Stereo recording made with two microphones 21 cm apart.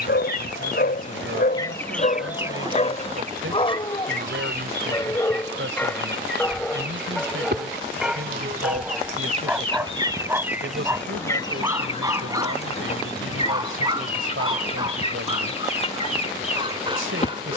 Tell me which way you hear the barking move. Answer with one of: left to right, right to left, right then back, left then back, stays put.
left to right.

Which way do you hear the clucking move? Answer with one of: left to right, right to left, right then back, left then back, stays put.
right then back.